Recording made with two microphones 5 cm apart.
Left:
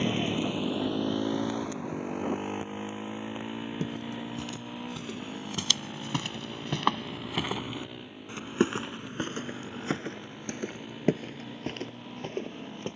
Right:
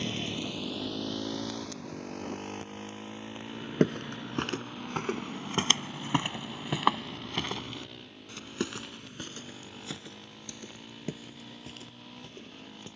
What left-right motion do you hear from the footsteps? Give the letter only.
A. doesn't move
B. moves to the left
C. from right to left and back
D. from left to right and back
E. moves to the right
B.